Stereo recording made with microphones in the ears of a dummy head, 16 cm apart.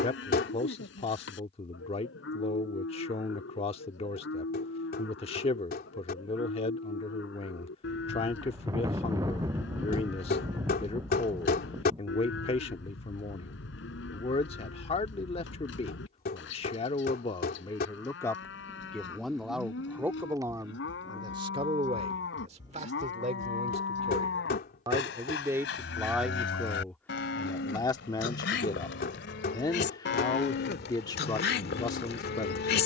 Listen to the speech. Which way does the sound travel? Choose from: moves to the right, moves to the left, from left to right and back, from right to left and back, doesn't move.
from left to right and back.